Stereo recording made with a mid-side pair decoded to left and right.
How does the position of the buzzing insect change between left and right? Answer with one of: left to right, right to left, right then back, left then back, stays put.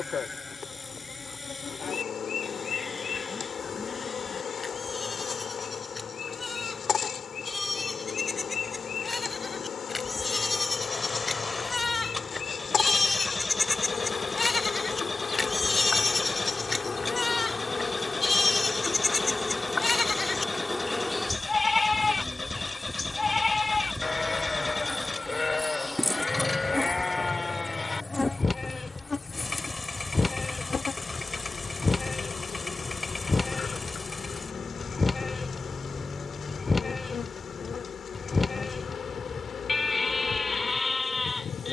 right then back.